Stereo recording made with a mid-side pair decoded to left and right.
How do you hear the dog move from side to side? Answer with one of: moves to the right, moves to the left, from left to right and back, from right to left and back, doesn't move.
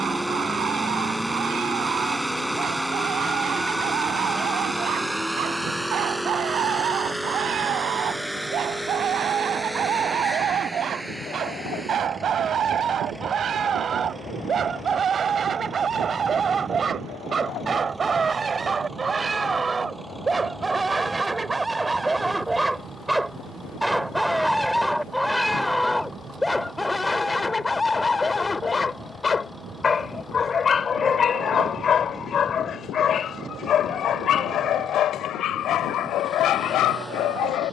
moves to the left.